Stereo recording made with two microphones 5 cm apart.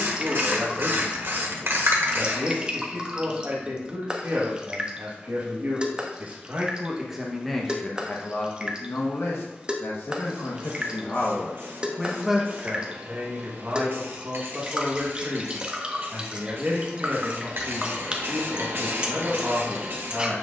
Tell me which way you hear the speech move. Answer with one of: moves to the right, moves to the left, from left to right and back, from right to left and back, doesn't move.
from right to left and back.